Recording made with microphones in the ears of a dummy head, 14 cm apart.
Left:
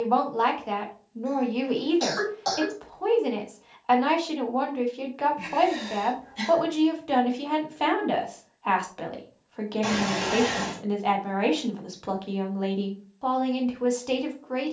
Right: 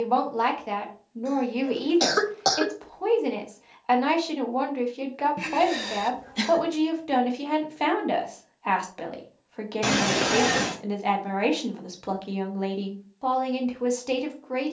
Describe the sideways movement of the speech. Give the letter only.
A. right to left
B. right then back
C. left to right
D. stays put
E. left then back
D.